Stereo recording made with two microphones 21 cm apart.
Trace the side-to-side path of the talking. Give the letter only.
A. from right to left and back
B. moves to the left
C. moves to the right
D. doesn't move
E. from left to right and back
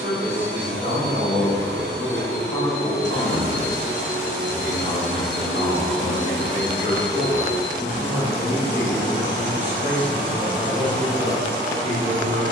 A.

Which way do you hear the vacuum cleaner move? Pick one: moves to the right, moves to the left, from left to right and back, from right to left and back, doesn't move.
moves to the left.